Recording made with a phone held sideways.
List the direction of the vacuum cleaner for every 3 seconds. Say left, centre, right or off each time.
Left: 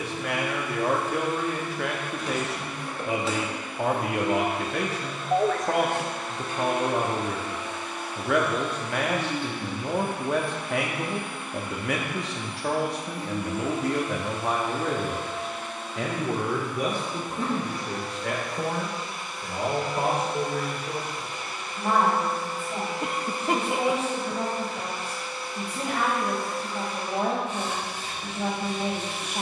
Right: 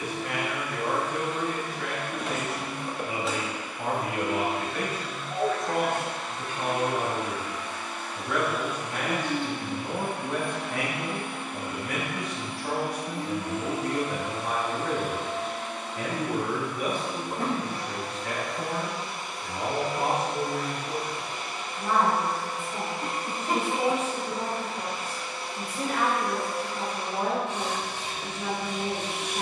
right, left, left, right, right, right, right, right, right, right.